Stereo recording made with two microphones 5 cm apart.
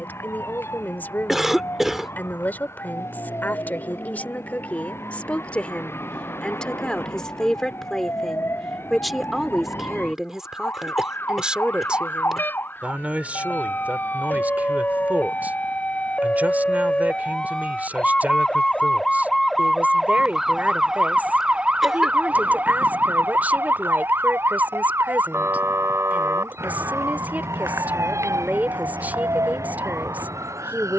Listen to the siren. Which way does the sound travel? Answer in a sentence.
You can hear the siren go from the left side to the right.